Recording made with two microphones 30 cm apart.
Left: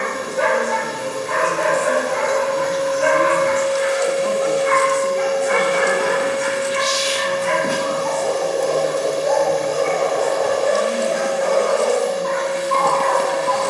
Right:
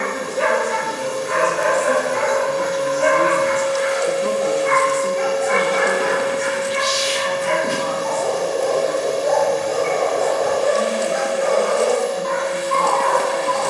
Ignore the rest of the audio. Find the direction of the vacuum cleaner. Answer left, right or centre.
left.